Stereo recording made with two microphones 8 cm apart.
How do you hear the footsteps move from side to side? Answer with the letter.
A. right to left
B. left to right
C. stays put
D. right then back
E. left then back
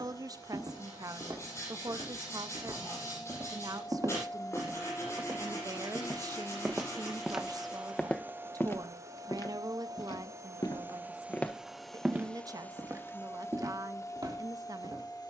E.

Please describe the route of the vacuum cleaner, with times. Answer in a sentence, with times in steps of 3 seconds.
You can hear the vacuum cleaner on the left from 0 s, in the centre from 6 s, on the right from 9 s and on the left from 12 s.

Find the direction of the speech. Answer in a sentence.
You can hear the speech on the right.